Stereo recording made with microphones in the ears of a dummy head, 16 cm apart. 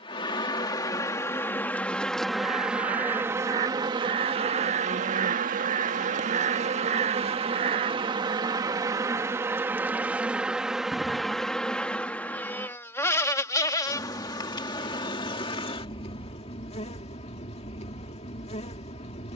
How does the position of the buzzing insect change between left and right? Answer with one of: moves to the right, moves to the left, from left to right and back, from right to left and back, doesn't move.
from left to right and back.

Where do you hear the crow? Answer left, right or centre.
right.